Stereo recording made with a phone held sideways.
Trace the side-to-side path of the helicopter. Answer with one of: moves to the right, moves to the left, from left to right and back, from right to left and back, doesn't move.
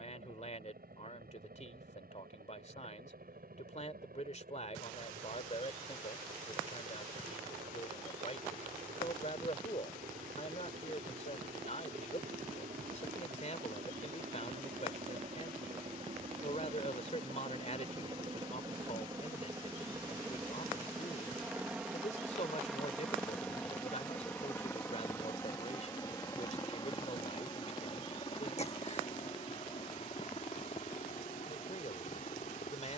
moves to the left.